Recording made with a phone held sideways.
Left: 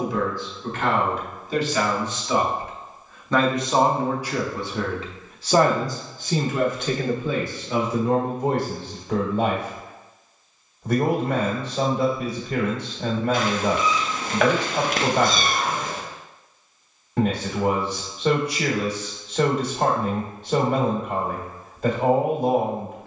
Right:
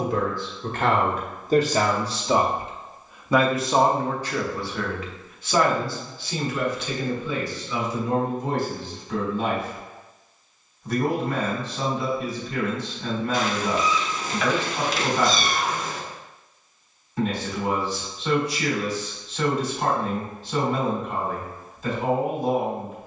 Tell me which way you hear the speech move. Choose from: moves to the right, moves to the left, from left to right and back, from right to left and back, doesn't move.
moves to the left.